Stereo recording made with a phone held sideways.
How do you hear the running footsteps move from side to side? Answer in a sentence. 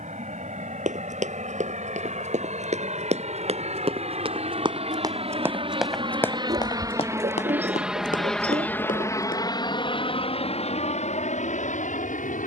In this clip you hear the running footsteps go from the right side to the left.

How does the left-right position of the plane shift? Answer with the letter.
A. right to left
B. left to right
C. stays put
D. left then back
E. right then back
A.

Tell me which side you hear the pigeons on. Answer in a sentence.
In this clip you hear the pigeons on the right.